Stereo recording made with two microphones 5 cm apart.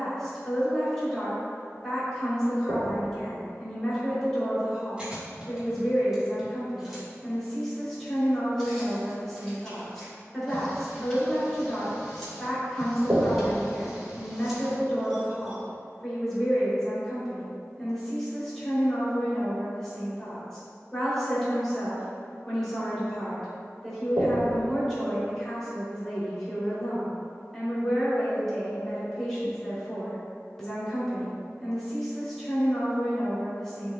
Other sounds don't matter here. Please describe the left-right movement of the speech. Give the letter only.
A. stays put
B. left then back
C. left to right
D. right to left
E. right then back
A.